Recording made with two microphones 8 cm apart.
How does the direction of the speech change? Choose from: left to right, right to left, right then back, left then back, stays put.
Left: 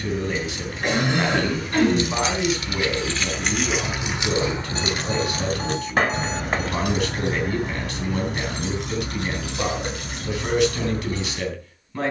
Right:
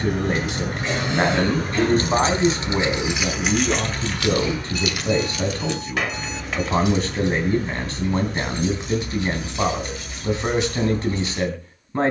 stays put.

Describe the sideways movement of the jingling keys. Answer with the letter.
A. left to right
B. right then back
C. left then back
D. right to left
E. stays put
D.